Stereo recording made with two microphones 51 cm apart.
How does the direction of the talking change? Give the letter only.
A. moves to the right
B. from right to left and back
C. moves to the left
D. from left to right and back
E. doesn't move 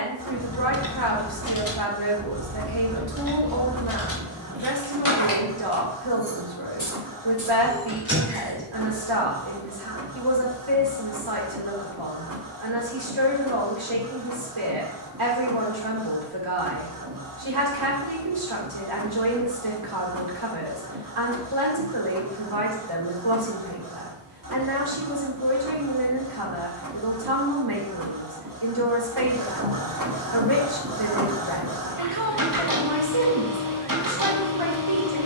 E.